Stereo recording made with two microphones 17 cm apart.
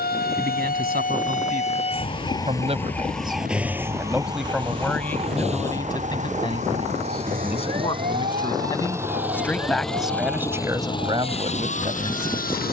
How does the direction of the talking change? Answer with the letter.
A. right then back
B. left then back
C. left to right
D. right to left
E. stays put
B.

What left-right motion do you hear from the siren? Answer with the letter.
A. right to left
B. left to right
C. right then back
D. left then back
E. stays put
B.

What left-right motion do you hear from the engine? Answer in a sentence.
You can hear the engine go from the right side to the left.